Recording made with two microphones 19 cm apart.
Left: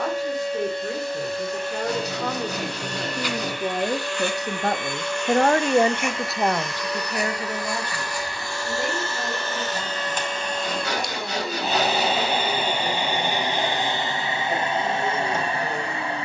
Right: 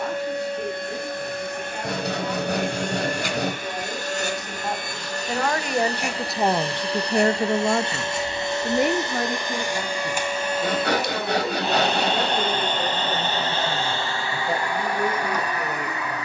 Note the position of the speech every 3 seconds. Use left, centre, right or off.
left, left, right, right, right, right.